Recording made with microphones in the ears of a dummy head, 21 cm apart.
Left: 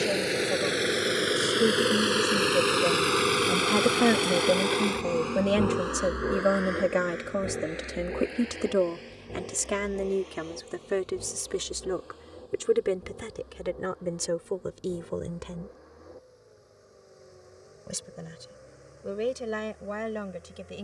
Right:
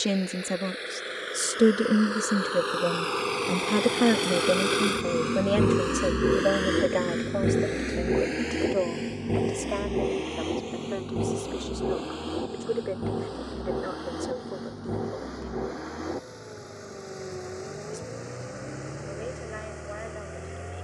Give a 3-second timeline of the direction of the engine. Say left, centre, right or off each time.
left, centre, right, right, right, right, right.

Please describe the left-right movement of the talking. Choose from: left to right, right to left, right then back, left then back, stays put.
right to left.